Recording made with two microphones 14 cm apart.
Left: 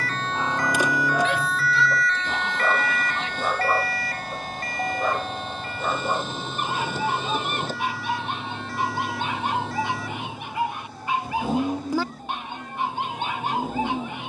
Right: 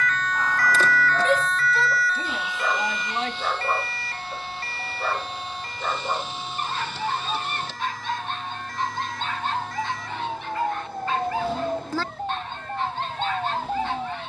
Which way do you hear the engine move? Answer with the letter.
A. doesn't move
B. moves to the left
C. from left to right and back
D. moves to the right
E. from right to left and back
A.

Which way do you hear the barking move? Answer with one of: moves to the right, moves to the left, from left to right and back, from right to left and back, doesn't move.
doesn't move.